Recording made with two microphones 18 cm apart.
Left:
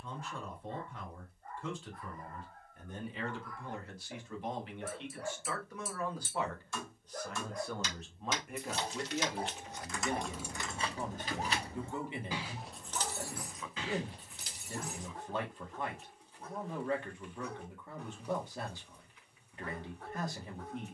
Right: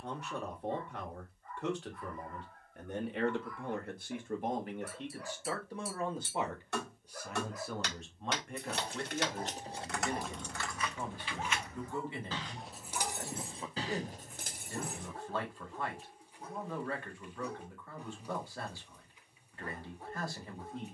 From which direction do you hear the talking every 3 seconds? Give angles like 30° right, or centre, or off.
70° right, 50° right, 10° right, 20° left, 20° left, 20° left, 20° left.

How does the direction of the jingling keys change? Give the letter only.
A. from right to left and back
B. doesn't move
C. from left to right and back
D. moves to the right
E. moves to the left
A.